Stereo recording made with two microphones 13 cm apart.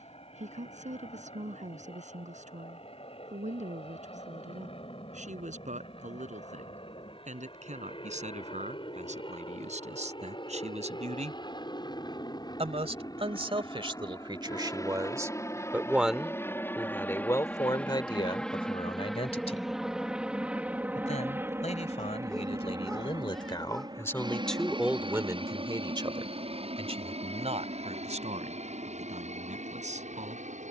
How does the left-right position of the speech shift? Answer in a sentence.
In this clip you hear the speech move from right to left and back again.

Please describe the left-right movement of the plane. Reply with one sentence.
In this clip you hear the plane travel towards the right.